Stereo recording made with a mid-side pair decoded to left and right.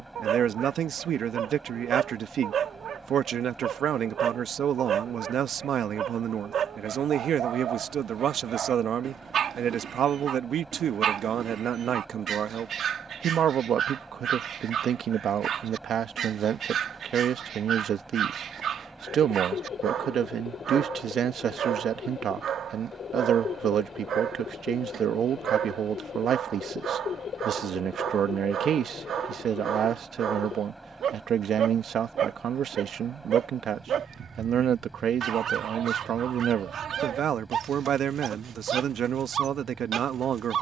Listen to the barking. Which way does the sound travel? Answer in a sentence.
You can hear the barking stay put.